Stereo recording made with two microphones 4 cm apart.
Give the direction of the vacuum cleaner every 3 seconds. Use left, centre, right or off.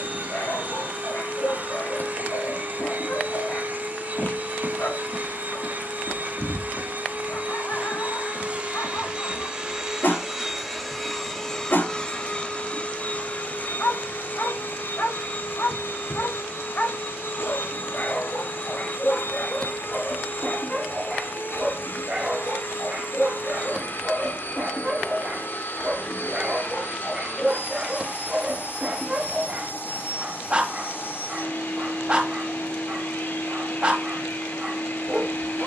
right, right, right, centre, left, left, left, left, left, left, left, left.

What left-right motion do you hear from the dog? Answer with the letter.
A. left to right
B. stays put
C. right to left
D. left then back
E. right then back
A.